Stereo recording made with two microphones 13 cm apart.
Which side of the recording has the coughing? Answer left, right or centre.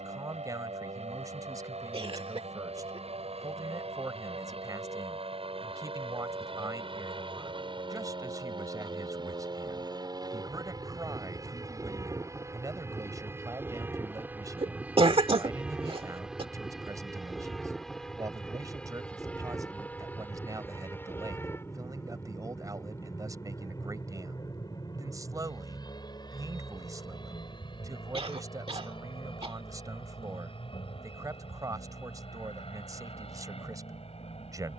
right.